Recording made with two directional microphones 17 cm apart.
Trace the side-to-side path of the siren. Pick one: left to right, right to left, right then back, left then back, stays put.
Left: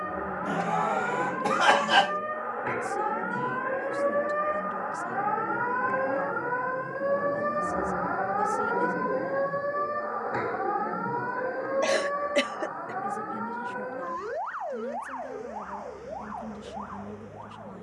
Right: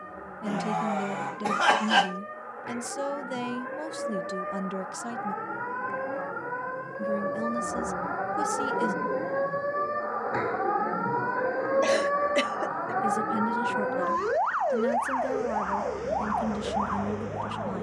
left to right.